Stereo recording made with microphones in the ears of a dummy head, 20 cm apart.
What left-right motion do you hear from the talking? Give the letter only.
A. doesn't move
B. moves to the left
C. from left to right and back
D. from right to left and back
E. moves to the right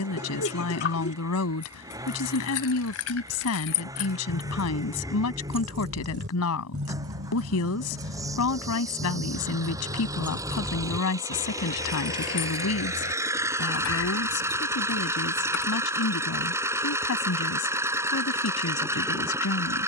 A.